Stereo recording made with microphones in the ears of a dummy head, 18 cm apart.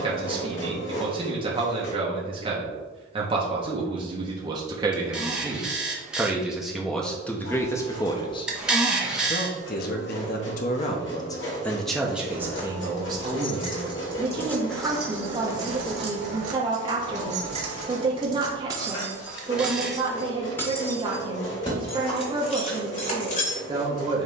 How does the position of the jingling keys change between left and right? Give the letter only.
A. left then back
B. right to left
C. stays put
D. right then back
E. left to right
D.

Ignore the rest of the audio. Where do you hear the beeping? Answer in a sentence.
In this clip you hear the beeping in the centre.